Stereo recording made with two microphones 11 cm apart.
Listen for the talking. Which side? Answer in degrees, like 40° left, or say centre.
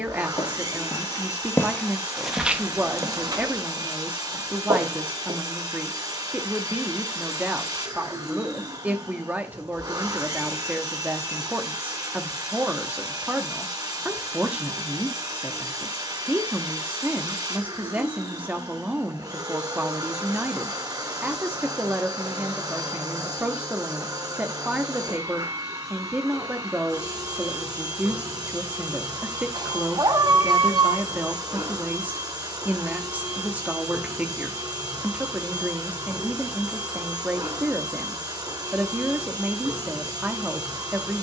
10° right.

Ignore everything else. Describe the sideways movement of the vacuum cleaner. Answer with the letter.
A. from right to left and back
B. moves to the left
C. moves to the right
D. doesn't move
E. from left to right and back
D.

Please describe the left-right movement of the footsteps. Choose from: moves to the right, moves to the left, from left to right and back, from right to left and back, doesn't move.
moves to the right.